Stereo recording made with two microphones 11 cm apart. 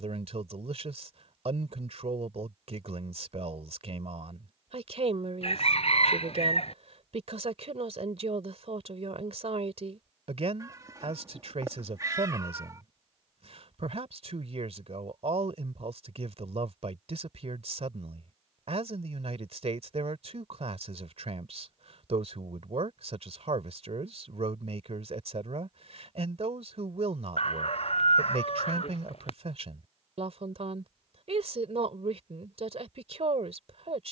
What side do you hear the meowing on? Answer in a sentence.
In this clip you hear the meowing on the right.